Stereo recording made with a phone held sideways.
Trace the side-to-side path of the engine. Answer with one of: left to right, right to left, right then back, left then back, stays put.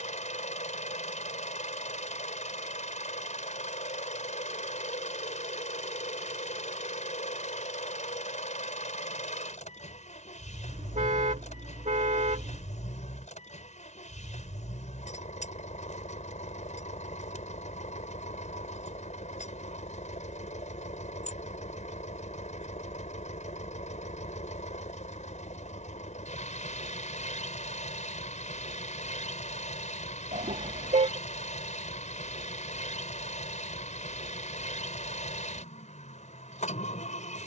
stays put.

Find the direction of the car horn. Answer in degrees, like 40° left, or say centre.
70° right.